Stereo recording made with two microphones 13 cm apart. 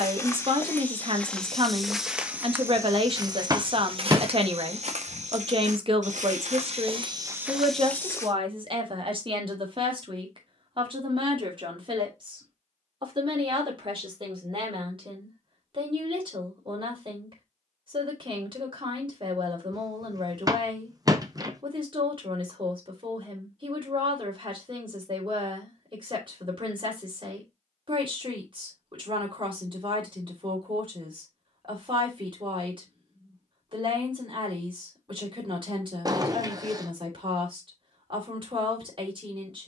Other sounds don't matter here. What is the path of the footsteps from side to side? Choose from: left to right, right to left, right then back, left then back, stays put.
right then back.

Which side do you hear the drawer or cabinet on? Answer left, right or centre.
right.